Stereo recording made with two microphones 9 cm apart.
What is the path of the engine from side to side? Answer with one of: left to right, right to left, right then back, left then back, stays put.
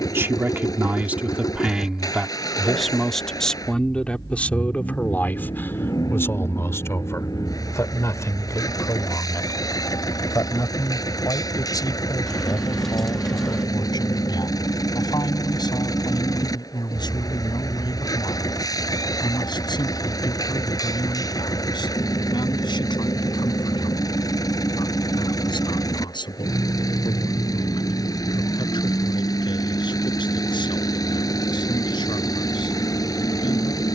stays put.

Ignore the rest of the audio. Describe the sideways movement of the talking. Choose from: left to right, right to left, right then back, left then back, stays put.
right to left.